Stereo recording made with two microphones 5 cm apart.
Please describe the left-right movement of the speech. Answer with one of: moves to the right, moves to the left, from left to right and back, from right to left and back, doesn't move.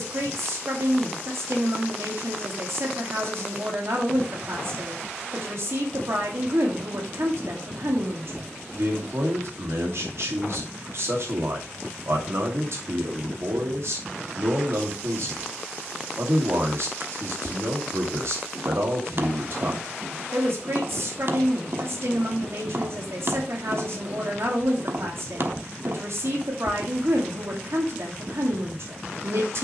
doesn't move.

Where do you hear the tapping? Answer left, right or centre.
right.